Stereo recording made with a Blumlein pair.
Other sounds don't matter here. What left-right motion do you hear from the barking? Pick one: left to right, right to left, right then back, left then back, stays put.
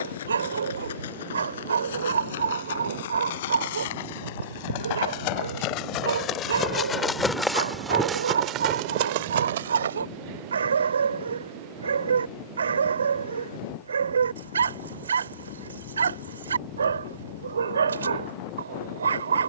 stays put.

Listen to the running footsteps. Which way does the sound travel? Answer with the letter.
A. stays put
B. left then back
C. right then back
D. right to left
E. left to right
E.